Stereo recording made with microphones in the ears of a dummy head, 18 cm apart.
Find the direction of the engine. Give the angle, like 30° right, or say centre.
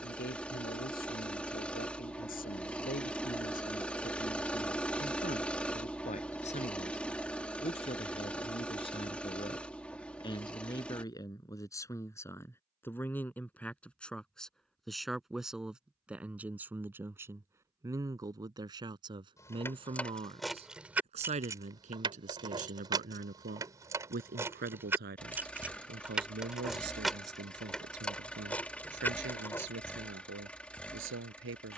10° left.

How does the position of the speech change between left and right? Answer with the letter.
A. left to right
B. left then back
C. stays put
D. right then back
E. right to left
A.